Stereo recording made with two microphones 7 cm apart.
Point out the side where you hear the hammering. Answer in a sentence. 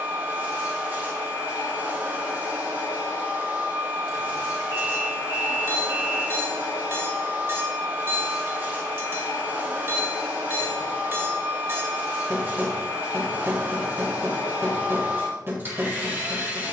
You can hear the hammering on the right.